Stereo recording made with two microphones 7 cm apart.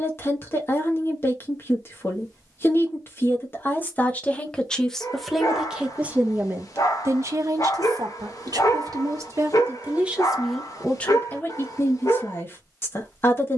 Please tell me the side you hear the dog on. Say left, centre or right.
left.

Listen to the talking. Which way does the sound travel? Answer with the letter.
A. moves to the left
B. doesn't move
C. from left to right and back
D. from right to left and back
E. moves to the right
C.